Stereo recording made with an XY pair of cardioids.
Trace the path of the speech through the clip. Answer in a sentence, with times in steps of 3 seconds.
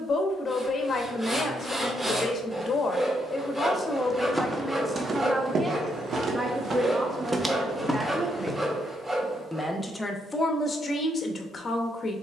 In this clip you hear the speech on the left from 0 s, in the centre from 3 s, on the right from 6 s and on the left from 9 s.